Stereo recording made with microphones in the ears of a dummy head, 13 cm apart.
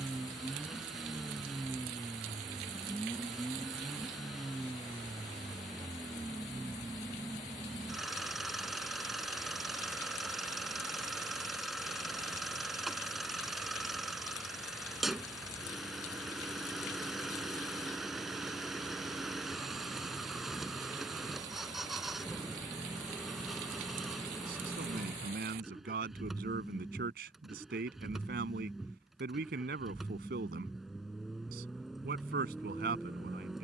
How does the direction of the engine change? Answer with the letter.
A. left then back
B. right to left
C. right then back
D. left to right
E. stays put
E.